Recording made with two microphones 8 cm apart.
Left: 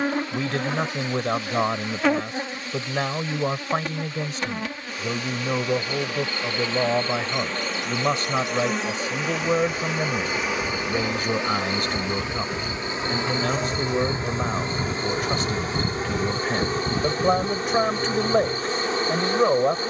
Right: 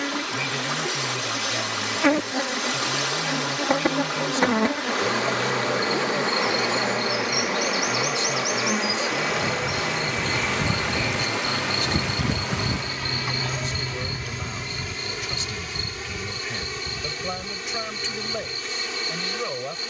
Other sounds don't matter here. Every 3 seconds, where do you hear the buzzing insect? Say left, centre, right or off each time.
centre, right, centre, centre, left, left, left.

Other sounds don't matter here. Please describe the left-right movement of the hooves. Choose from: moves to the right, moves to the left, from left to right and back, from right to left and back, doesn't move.
moves to the left.